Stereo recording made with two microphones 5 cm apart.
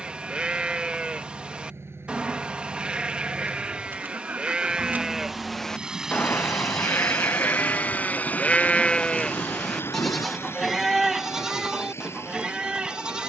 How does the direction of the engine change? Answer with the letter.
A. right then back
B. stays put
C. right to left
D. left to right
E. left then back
C.